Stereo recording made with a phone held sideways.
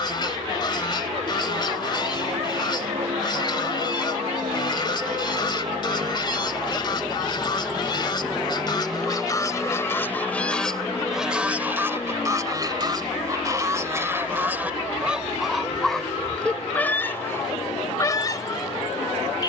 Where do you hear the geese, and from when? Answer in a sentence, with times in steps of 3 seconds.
You can hear the geese on the left from 0 s, in the centre from 9 s, on the right from 12 s, in the centre from 15 s and on the left from 18 s.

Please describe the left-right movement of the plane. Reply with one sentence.
You can hear the plane move to the left.